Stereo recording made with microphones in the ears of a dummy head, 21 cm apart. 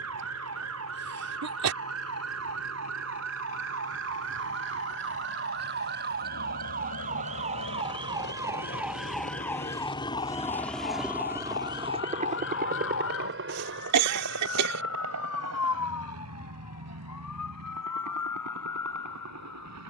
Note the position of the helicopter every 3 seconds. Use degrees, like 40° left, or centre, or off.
80° left, 70° left, 60° left, 10° left, 50° right, 70° right, 70° right.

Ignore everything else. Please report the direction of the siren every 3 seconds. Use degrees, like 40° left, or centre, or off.
60° right, 50° right, 30° right, 30° left, 60° left, 70° left, 80° left.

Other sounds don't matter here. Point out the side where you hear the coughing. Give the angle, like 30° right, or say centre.
80° right.